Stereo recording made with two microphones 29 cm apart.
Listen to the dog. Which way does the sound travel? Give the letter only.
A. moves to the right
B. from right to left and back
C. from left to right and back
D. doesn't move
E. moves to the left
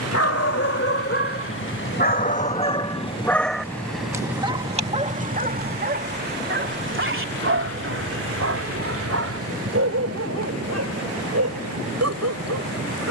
A.